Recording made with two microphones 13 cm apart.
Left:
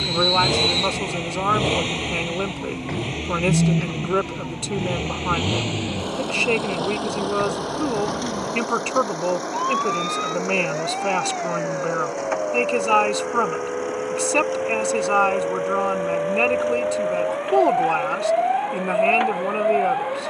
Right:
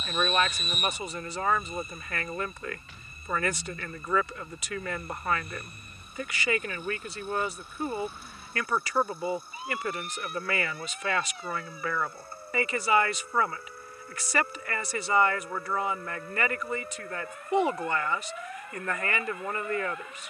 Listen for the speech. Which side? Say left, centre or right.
left.